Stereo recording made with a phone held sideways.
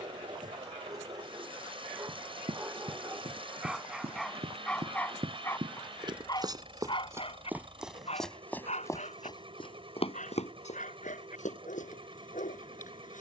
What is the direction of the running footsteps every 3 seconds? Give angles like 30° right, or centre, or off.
60° right, 50° right, 10° right, 60° left, off.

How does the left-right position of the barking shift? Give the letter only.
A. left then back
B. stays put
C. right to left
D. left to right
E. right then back
C.